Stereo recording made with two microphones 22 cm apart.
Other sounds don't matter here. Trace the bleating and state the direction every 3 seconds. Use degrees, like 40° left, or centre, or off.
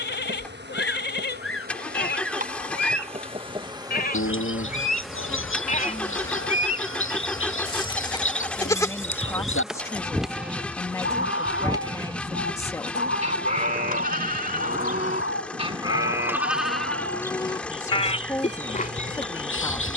60° left, 50° left, 20° left, centre, 40° right, centre, 40° left.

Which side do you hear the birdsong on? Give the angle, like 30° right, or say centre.
80° left.